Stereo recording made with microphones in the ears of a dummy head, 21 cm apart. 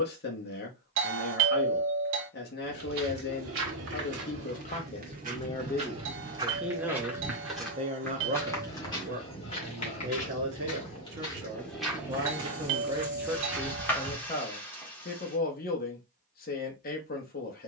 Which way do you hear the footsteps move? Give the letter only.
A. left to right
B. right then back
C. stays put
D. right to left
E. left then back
E.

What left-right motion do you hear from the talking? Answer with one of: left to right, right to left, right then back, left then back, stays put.
right then back.